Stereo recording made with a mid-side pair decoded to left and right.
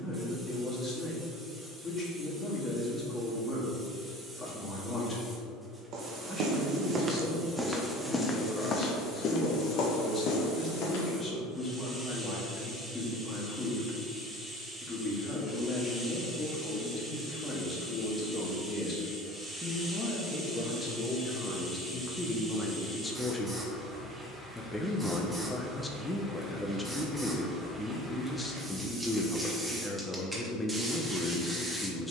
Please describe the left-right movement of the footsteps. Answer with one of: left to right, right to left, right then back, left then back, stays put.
right to left.